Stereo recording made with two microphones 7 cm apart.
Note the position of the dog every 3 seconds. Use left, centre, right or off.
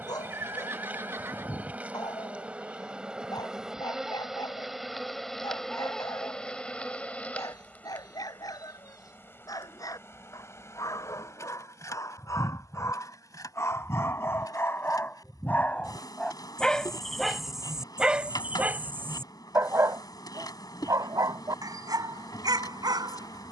left, left, left, left, left, centre, right, right.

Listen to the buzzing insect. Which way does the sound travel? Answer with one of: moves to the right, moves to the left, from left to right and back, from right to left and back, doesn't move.
moves to the left.